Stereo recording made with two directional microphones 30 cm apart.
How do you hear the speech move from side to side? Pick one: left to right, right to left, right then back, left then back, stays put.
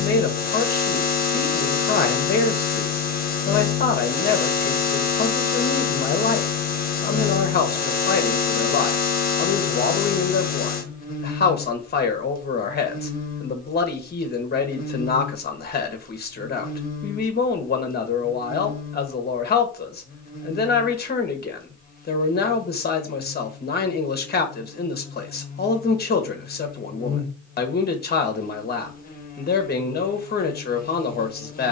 stays put.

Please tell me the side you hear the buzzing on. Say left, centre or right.
left.